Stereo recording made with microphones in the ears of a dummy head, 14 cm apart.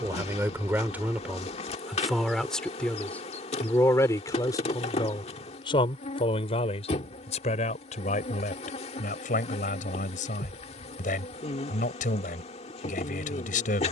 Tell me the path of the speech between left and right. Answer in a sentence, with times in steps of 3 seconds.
In this clip you hear the speech in the centre from 0 s and on the left from 3 s.